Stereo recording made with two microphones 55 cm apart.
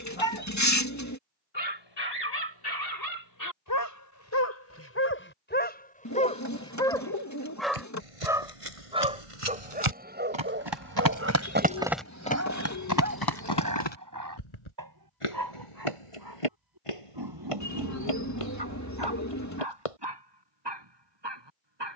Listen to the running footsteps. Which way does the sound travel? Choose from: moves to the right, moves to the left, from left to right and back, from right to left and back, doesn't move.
moves to the left.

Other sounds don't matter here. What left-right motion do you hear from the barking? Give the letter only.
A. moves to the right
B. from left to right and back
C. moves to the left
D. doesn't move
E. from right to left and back
A.